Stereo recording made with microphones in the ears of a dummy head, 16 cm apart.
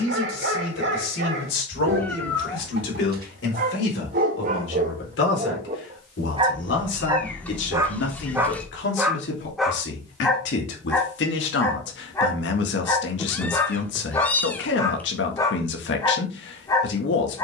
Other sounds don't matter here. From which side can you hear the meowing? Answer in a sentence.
You can hear the meowing in the centre.